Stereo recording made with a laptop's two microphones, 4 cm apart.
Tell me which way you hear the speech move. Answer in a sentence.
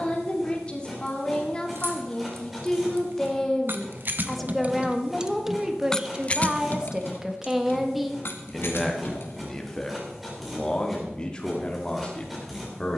In this clip you hear the speech move from left to right and back again.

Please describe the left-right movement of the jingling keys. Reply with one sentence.
You can hear the jingling keys move to the left.